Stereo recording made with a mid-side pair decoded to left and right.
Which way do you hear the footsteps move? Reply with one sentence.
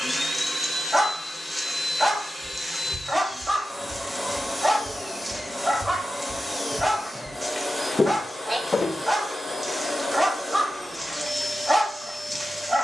You can hear the footsteps go from the right side to the left.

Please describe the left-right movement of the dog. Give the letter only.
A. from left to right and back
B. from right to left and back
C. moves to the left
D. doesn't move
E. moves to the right
D.